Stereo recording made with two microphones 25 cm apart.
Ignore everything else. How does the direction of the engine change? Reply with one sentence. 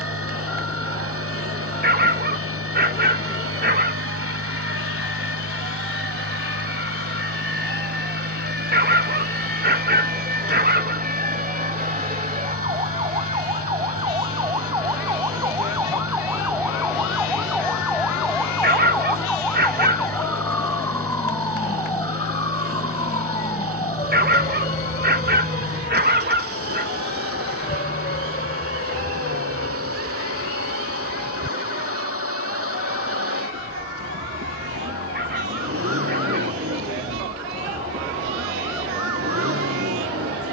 You can hear the engine stay in one place.